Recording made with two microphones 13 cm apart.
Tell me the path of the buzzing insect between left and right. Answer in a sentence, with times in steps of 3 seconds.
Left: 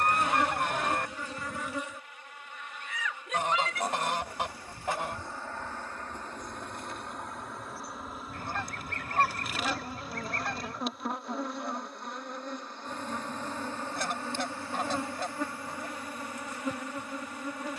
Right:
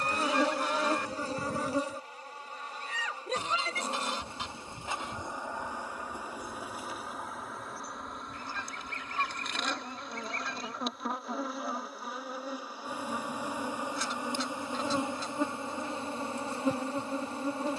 You can hear the buzzing insect on the right from 0 s, in the centre from 6 s and on the right from 15 s.